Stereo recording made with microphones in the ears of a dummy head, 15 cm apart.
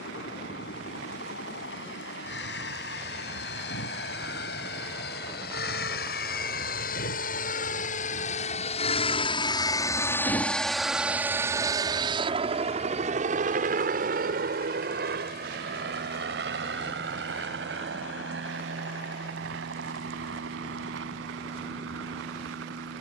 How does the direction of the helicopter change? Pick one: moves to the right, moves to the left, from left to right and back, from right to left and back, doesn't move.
moves to the right.